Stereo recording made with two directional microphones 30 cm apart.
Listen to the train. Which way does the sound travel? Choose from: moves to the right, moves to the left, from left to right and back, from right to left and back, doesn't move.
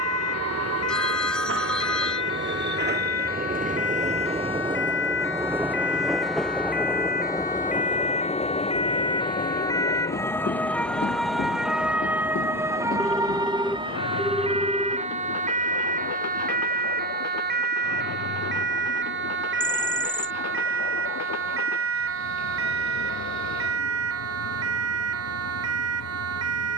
moves to the left.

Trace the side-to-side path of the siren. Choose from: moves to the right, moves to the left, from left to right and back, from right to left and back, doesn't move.
moves to the right.